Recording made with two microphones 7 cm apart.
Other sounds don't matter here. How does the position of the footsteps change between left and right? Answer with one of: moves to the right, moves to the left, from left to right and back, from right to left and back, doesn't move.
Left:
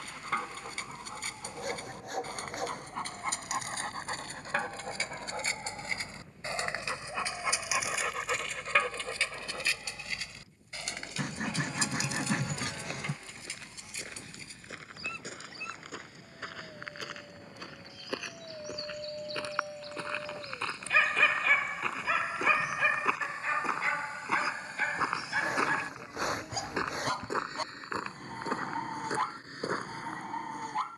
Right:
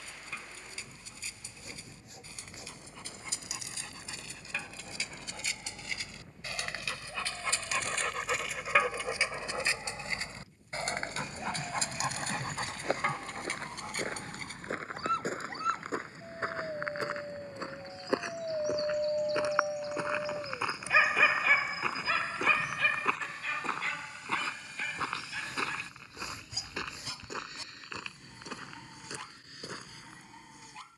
moves to the left.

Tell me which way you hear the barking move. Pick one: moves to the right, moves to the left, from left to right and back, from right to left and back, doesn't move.
from left to right and back.